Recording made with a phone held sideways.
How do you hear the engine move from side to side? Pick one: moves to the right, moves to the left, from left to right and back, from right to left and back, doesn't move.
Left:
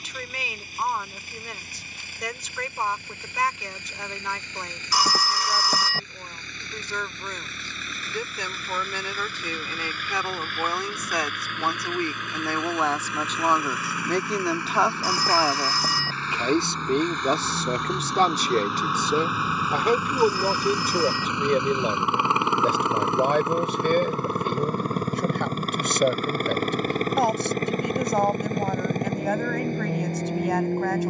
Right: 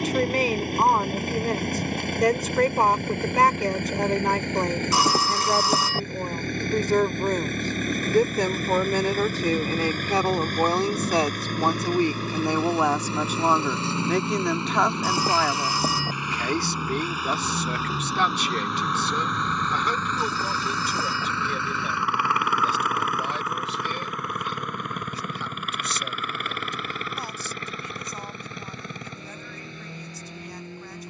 moves to the left.